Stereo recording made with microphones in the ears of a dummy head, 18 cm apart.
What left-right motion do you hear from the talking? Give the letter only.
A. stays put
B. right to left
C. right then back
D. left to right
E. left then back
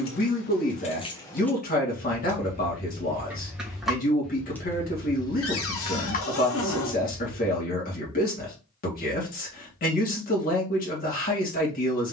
A.